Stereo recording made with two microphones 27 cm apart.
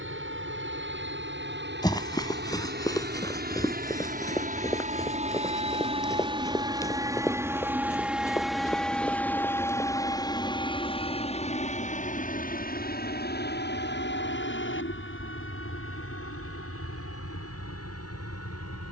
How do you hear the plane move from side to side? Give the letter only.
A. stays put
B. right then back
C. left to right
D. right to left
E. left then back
D.